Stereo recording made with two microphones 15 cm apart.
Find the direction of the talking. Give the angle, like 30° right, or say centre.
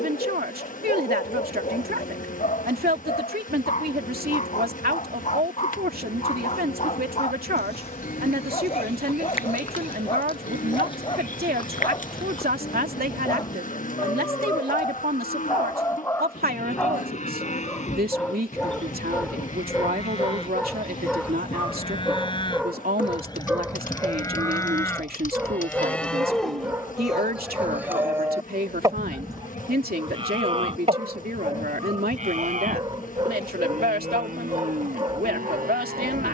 80° right.